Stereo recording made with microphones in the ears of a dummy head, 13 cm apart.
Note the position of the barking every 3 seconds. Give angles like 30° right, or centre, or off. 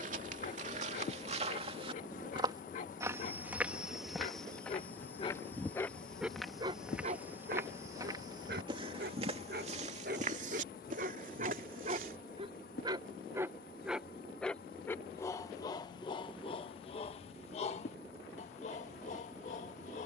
50° left, 40° left, 50° right, 60° right, 10° right, 30° left, 50° left.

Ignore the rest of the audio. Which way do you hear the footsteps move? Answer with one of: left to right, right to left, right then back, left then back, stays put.
left then back.